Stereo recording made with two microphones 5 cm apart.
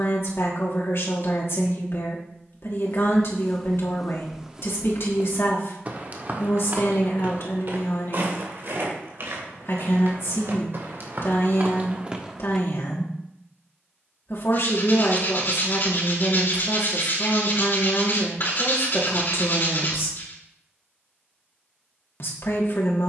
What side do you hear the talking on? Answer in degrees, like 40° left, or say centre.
70° left.